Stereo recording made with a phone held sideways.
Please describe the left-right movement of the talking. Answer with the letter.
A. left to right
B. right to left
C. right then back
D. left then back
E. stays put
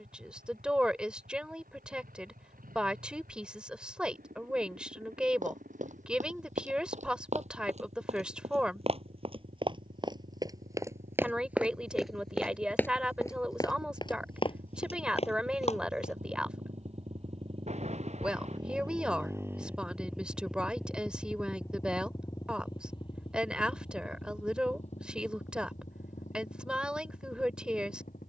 E.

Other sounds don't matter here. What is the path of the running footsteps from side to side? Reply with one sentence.
You can hear the running footsteps travel towards the left.